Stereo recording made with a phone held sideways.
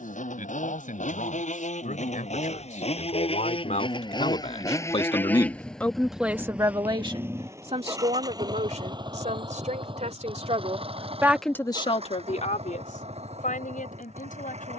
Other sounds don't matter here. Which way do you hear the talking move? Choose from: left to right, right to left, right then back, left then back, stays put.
right then back.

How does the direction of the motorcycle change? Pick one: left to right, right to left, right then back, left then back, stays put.
left to right.